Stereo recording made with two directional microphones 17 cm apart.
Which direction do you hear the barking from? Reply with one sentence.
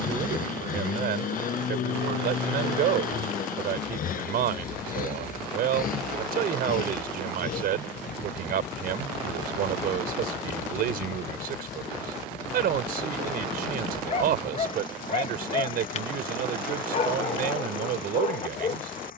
You can hear the barking on the left.